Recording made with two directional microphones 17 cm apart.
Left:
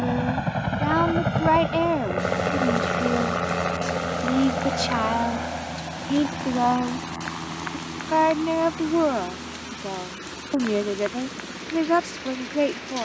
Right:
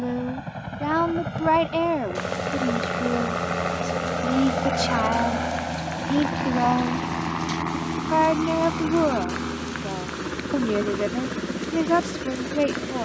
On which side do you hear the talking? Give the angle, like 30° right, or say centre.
centre.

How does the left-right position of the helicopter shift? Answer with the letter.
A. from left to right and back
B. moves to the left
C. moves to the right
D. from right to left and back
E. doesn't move
C.